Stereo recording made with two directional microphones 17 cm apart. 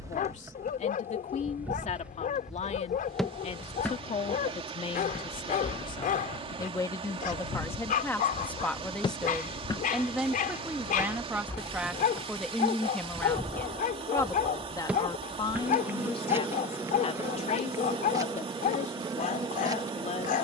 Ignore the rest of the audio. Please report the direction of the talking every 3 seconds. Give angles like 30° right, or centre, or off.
40° left, 30° left, 10° left, 10° right, 10° left, 30° left, 40° left.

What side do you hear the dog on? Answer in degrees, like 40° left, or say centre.
50° left.